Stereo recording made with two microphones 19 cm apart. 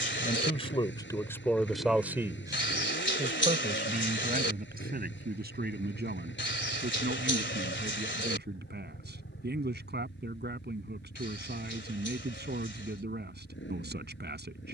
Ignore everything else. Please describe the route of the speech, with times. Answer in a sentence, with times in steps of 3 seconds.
In this clip you hear the speech in the centre from 0 s and on the right from 3 s.